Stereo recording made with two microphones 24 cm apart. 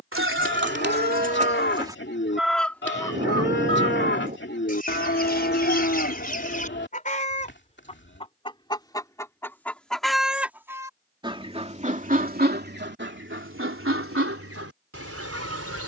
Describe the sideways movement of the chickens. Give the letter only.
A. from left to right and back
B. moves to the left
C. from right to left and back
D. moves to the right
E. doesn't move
C.